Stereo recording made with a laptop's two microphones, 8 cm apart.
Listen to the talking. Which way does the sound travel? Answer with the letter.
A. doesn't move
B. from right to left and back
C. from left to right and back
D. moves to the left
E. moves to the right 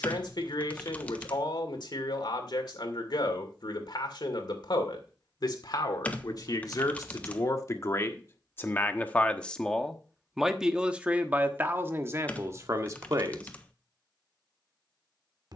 E.